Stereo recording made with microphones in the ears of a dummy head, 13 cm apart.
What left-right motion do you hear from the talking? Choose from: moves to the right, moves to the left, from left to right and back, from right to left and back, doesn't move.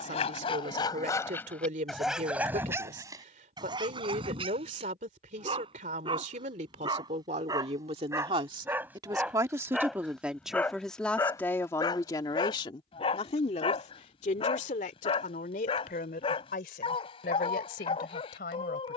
moves to the left.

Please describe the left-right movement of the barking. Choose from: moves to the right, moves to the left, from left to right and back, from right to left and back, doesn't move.
from left to right and back.